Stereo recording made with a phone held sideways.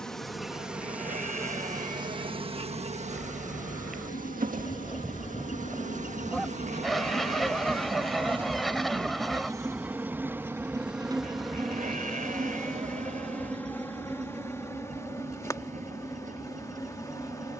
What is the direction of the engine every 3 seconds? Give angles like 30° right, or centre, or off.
70° left, 60° left, 30° left, 20° right, 50° right, 60° right.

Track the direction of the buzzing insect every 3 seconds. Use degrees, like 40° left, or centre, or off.
20° right, 60° right, 40° right, 10° right, 10° left, 20° left.